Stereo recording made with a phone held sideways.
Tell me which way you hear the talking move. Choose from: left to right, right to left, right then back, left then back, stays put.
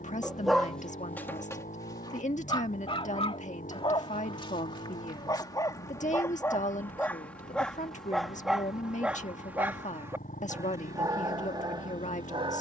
stays put.